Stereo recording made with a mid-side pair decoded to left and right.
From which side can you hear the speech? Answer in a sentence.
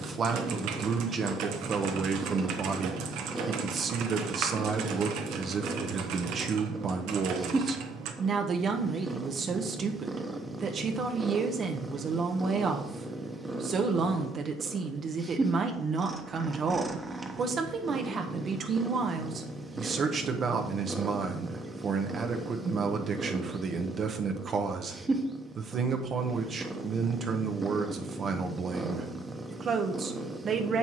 In this clip you hear the speech on the right.